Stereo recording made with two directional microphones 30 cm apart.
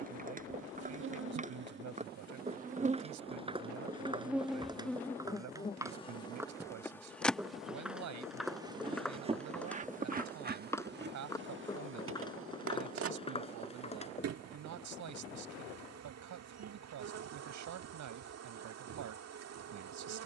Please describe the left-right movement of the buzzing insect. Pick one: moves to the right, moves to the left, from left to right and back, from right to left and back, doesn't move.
from right to left and back.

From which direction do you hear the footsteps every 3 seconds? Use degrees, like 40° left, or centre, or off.
20° right, 10° right, centre, 10° left, 20° left, off, off.